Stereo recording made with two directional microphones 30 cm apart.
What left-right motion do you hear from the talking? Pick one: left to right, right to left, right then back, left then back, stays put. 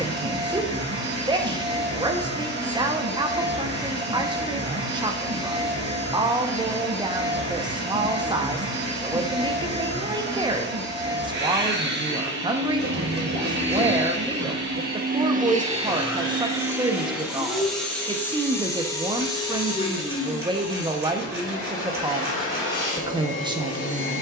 stays put.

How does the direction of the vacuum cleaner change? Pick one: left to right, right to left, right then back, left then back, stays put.
right to left.